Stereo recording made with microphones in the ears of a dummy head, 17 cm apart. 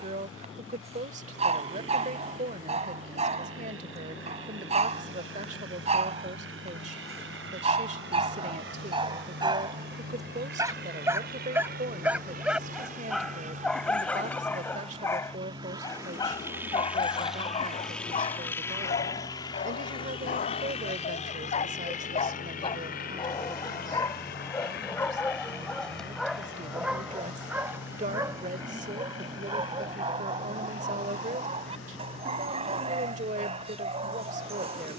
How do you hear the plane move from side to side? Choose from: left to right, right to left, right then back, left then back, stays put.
right to left.